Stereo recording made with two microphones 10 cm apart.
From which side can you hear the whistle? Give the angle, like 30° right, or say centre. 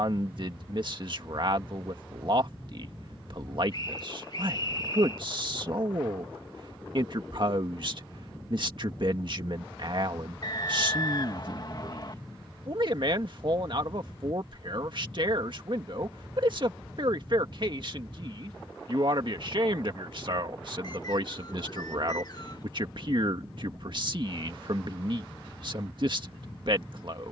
40° left.